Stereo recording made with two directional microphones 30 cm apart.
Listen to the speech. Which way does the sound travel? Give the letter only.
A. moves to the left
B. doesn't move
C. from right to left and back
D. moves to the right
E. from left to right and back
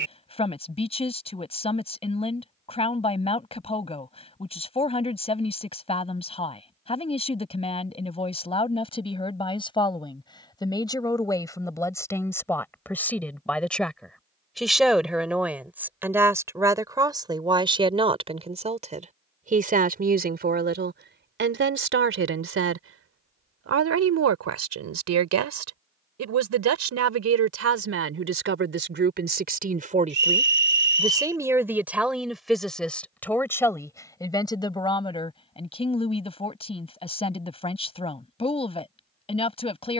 E.